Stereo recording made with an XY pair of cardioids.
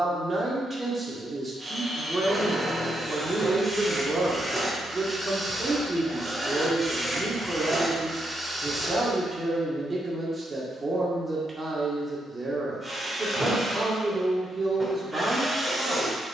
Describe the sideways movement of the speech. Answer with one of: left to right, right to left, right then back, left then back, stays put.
stays put.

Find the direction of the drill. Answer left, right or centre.
centre.